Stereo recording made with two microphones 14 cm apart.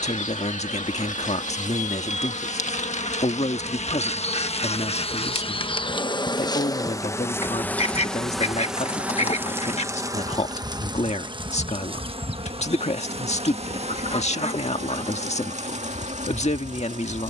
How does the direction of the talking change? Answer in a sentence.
In this clip you hear the talking stay in one place.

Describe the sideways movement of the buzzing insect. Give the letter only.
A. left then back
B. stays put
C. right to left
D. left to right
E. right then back
D.